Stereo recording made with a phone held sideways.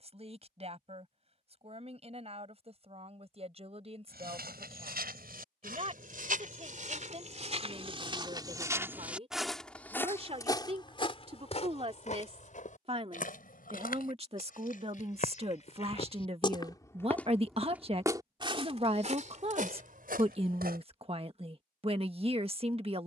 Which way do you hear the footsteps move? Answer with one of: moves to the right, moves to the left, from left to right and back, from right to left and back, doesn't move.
from right to left and back.